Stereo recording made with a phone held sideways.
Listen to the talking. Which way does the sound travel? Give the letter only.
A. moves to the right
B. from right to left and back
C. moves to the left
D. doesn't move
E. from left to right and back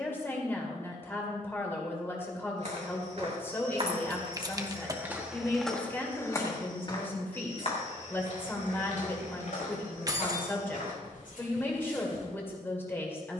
D.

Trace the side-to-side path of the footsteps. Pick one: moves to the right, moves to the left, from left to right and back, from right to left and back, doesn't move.
moves to the left.